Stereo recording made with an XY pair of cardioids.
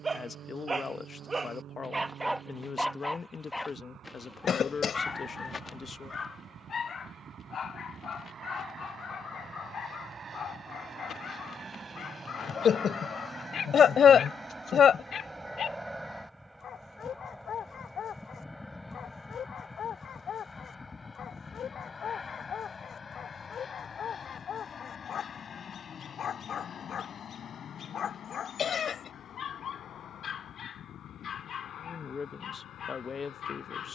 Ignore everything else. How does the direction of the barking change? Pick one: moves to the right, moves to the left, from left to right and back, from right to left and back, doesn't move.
moves to the left.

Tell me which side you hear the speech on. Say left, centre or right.
left.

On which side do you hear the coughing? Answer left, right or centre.
left.